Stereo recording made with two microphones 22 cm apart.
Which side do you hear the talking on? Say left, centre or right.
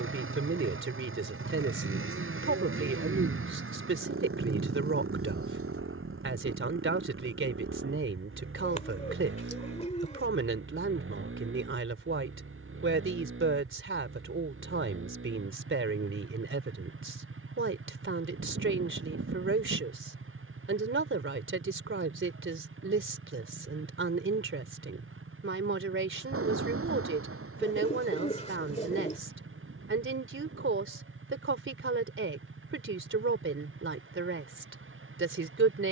right.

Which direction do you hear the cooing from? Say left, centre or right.
left.